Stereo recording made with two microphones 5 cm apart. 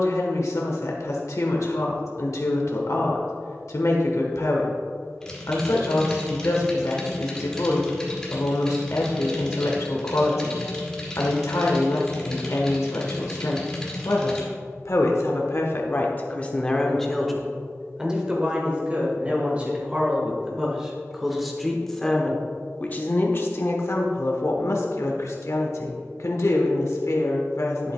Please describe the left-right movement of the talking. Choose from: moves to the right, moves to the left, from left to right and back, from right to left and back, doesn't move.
from left to right and back.